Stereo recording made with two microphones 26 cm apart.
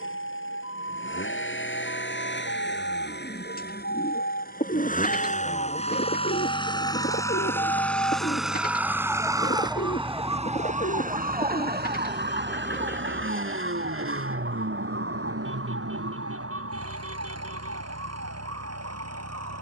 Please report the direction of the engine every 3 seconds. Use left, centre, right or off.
left, left, centre, right, right, right, right.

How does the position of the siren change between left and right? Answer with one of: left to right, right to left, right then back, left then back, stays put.
left to right.